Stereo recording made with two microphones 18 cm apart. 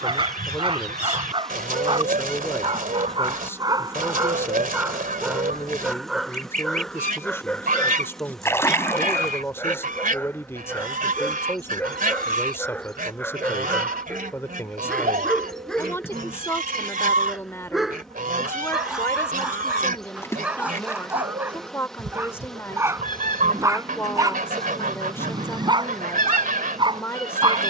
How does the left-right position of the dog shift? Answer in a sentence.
You can hear the dog go left and come back.